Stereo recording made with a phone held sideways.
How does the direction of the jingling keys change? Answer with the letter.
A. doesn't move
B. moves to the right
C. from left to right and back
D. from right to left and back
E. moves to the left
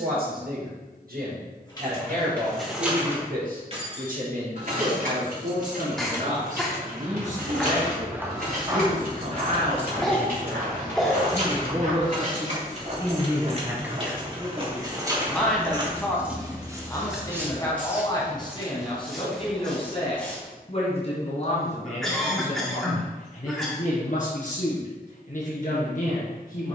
C.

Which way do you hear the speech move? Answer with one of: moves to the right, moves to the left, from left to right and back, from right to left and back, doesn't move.
moves to the left.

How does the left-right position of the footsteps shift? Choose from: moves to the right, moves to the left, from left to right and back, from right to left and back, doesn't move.
from left to right and back.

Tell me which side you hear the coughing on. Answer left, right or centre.
centre.